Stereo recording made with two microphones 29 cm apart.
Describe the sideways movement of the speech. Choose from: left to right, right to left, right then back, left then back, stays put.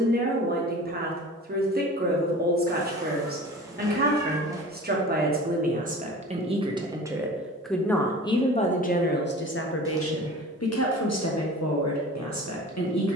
right to left.